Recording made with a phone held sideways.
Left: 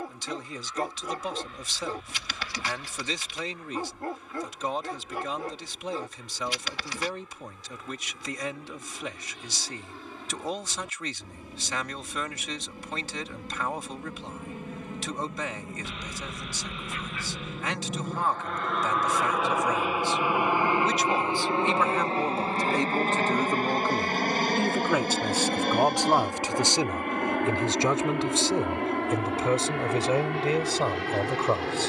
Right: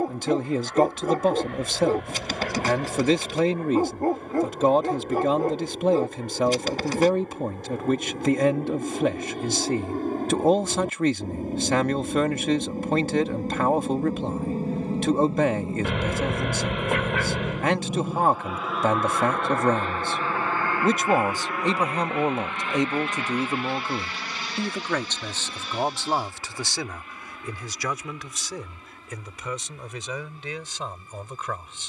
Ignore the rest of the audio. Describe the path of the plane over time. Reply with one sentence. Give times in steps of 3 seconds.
In this clip you hear the plane on the right from 0 s, in the centre from 18 s and on the left from 21 s.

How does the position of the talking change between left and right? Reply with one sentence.
You can hear the talking go from the right side to the left.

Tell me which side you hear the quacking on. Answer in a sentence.
In this clip you hear the quacking on the right.